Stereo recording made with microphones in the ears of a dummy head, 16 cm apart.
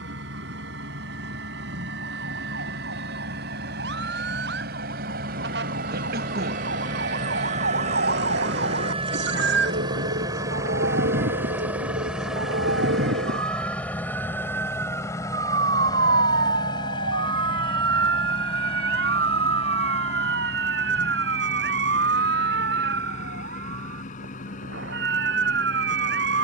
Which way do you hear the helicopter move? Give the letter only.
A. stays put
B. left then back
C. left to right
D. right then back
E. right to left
E.